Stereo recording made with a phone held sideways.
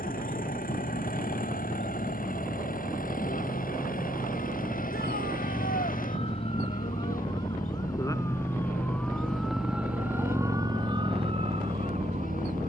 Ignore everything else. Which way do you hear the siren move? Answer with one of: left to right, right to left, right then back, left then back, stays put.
left to right.